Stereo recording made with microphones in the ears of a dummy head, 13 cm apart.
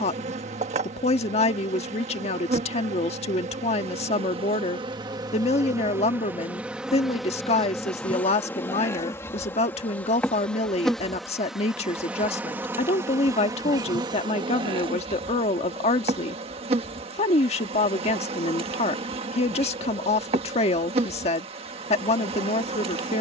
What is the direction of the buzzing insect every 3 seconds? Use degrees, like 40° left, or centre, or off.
50° right, 30° right, centre, 10° left, 20° right, 40° right, 40° right, 40° right.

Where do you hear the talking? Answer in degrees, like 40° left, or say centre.
50° left.